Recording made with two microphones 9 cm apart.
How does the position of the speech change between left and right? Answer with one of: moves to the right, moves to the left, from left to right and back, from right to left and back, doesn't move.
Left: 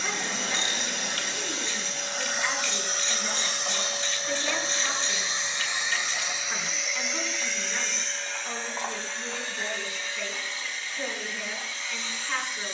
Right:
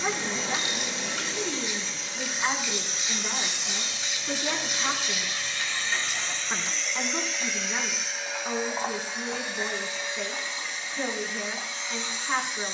doesn't move.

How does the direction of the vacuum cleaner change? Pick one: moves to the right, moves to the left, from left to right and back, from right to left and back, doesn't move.
moves to the right.